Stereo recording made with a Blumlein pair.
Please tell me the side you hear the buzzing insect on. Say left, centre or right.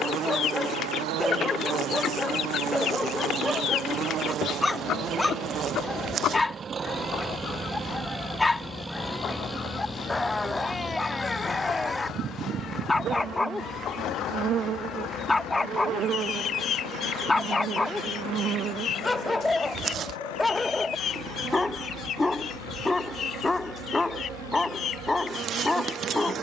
right.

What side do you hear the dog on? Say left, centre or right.
centre.